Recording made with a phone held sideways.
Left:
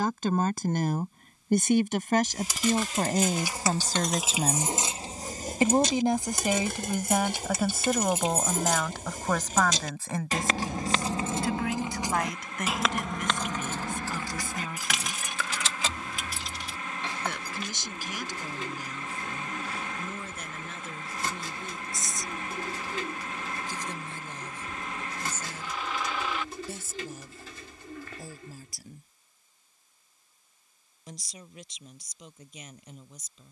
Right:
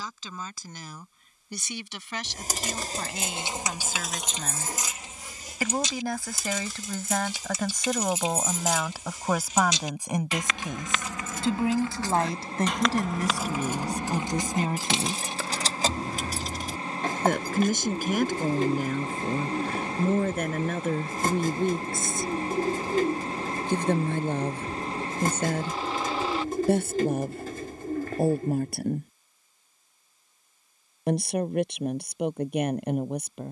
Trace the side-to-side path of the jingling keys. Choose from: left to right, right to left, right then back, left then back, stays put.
left then back.